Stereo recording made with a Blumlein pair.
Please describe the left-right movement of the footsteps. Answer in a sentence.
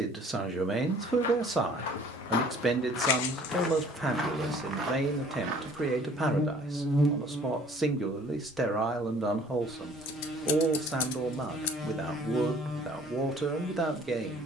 In this clip you hear the footsteps travel towards the right.